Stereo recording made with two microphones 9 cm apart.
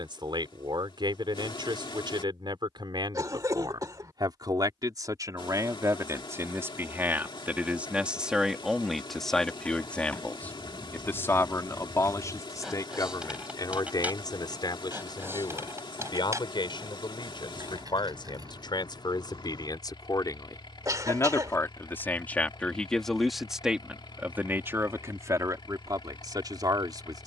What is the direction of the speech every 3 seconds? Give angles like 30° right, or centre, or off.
60° right, 50° right, 20° right, 20° left, 40° left, 60° left, 50° left, 10° left, 40° right.